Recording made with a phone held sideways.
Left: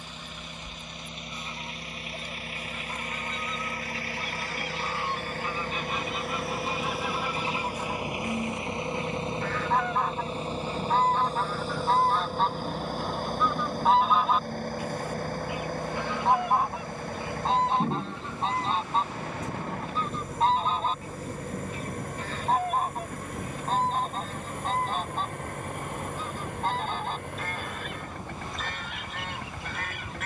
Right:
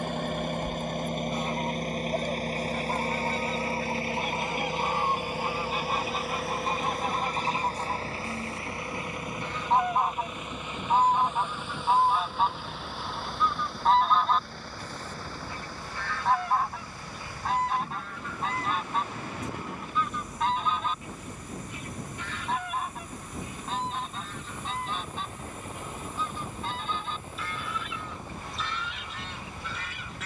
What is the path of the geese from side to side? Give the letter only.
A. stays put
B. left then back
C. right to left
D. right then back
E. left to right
C.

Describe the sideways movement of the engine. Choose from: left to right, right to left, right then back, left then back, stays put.
right to left.